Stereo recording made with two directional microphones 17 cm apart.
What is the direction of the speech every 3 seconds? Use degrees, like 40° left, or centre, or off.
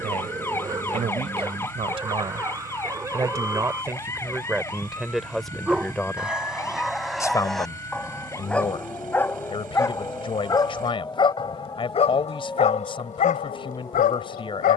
40° right, 10° right, 20° left, 30° left, 30° left.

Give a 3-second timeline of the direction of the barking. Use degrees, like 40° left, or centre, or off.
20° right, 10° right, centre, 20° left, 50° left.